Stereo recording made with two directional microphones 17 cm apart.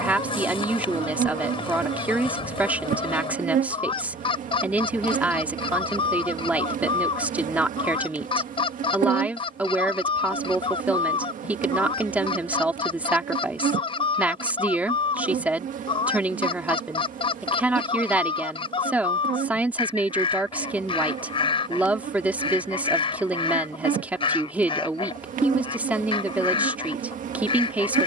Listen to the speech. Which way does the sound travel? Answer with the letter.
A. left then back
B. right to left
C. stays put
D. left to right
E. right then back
C.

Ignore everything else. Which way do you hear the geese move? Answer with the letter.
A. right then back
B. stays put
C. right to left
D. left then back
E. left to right
B.